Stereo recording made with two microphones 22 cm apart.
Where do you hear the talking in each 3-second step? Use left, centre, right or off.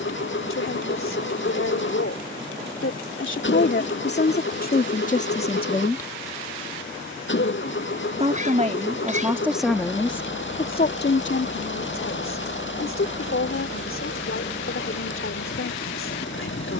left, left, right, left, left, left.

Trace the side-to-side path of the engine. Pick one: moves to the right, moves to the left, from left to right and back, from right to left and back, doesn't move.
doesn't move.